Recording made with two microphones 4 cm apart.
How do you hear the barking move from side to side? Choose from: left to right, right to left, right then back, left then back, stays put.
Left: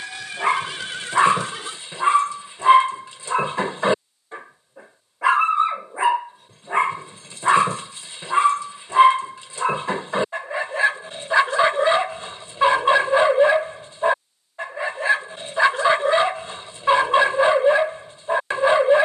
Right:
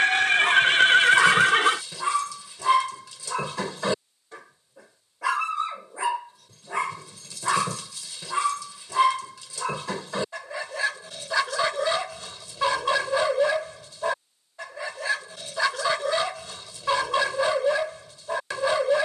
stays put.